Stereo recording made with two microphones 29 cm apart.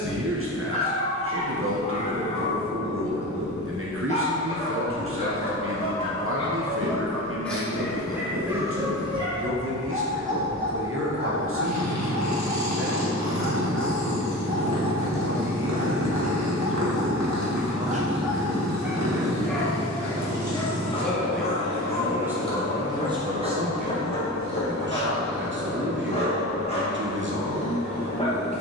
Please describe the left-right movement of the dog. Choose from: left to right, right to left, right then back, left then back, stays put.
right then back.